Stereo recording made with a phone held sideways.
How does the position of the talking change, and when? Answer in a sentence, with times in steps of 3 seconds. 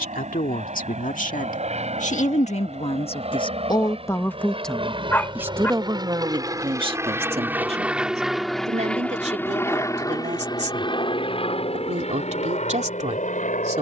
In this clip you hear the talking on the left from 0 s, in the centre from 3 s and on the right from 6 s.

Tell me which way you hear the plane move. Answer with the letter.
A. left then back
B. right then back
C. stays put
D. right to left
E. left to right
D.